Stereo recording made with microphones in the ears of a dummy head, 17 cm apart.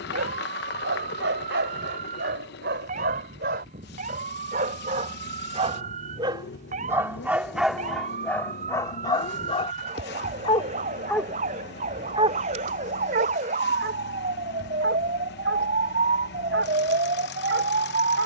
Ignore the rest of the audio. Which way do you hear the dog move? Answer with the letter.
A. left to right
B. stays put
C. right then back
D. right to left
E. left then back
E.